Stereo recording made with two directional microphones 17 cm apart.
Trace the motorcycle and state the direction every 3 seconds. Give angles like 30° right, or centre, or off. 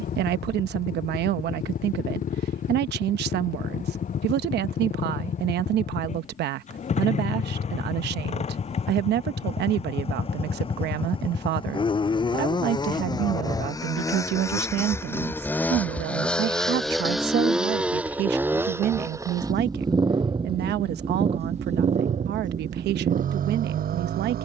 50° left, 40° left, 40° left, 30° left, 20° left, centre, 20° right, 40° right.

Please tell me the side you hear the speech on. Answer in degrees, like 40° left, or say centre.
70° right.